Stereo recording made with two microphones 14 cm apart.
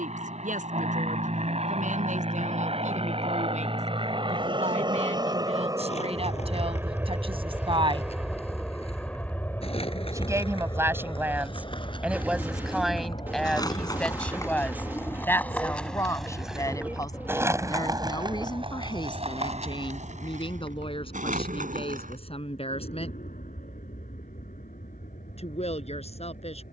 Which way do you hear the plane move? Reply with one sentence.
You can hear the plane go from the right side to the left.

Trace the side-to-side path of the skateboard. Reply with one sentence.
In this clip you hear the skateboard move to the right.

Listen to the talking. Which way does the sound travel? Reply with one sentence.
You can hear the talking go from the right side to the left.